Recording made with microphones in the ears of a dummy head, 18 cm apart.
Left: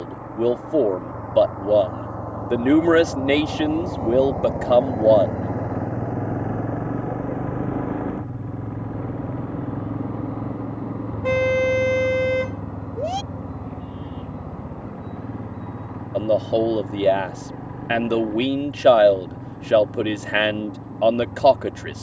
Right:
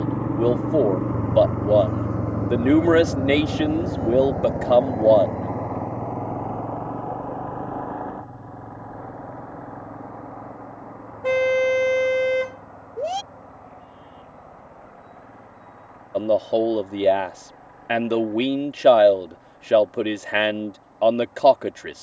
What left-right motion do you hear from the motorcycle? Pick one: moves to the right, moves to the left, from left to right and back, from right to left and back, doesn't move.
moves to the left.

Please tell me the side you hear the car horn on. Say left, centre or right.
centre.